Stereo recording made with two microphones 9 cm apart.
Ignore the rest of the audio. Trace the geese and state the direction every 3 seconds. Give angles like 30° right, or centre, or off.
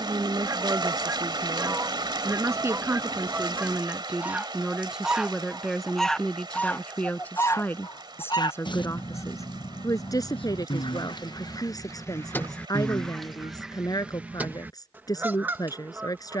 30° right, 10° right, 30° left, 60° left, centre, 20° right.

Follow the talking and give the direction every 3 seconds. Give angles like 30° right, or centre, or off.
40° right, 10° right, 20° left, 40° left, 40° left, 40° left.